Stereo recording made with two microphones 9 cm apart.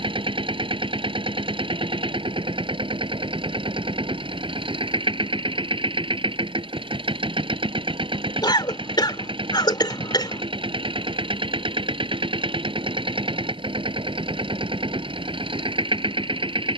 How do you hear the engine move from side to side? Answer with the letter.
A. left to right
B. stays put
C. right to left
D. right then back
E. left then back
B.